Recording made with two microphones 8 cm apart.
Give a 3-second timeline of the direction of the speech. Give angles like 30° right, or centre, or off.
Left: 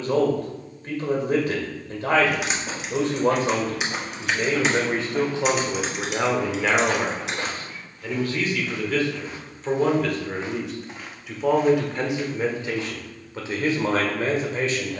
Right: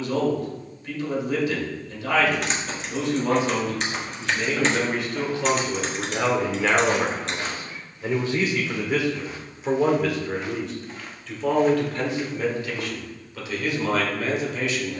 40° left, 30° left, 10° right, centre, 30° left.